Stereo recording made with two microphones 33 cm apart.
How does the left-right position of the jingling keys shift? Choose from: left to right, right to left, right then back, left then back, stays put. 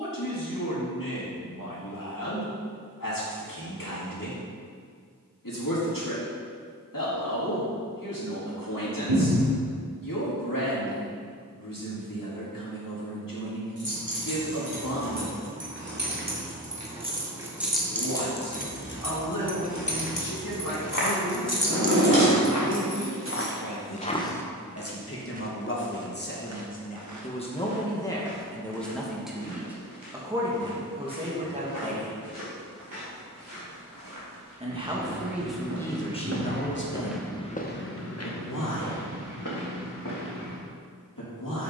left then back.